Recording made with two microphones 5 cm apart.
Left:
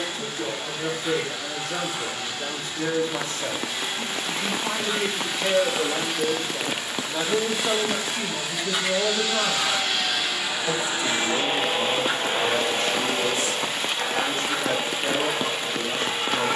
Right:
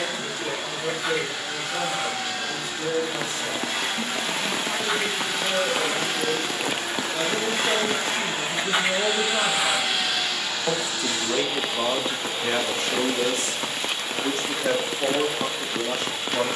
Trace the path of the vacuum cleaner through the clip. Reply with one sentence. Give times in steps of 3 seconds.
You can hear the vacuum cleaner on the right from 0 s, in the centre from 9 s and on the left from 12 s.